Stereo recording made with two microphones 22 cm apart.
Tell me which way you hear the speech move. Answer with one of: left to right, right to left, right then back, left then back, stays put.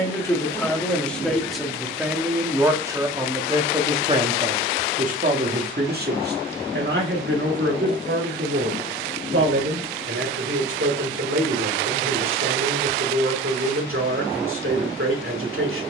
left to right.